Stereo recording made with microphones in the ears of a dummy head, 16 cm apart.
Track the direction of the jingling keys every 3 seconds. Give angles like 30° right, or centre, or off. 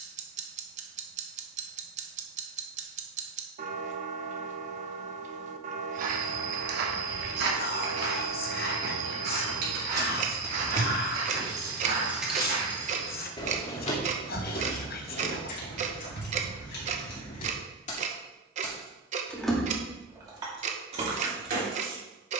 off, off, off, 40° right, 30° left, 60° left, centre, 40° right.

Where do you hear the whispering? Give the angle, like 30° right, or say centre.
50° left.